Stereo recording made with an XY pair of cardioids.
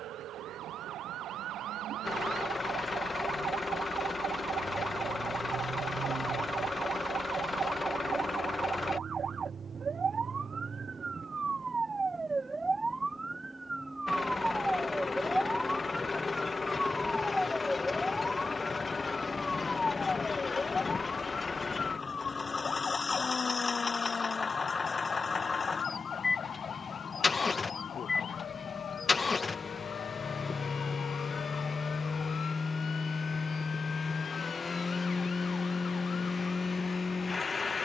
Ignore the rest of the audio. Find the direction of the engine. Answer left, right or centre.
left.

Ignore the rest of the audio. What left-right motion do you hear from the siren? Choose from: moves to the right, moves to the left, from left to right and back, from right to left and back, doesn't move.
moves to the left.